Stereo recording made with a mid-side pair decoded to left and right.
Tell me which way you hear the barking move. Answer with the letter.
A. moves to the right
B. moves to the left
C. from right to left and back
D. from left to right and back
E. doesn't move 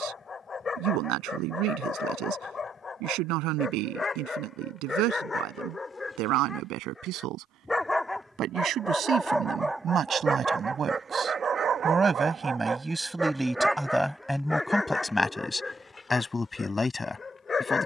D.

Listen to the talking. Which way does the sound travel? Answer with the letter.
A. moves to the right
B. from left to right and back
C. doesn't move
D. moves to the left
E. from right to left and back
D.